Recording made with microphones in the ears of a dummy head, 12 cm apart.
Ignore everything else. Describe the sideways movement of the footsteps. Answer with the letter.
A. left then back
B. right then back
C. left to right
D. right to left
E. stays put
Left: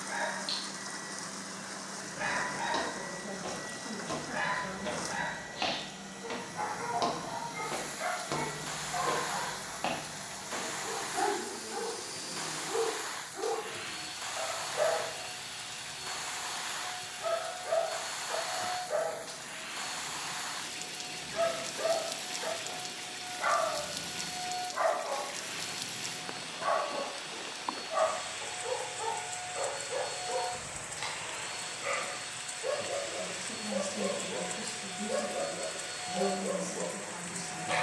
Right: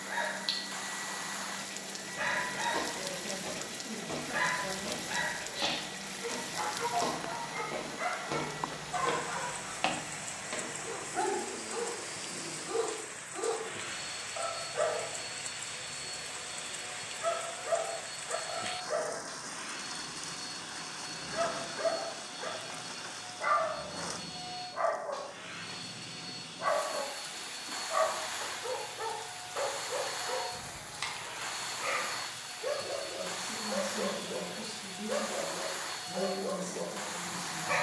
C.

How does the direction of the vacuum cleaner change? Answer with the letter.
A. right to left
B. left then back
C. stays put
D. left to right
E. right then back
A.